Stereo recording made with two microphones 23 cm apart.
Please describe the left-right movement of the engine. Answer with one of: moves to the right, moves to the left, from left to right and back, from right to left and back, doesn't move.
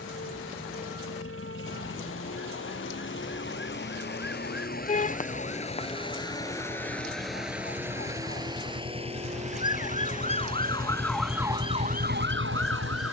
moves to the right.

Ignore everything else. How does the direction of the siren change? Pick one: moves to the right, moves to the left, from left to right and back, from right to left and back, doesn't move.
moves to the right.